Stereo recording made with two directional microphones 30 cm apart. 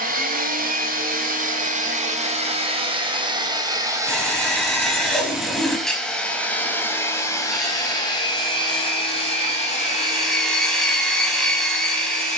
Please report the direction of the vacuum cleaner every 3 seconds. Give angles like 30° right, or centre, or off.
30° right, 10° right, 10° left, 30° left.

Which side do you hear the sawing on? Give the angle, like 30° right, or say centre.
centre.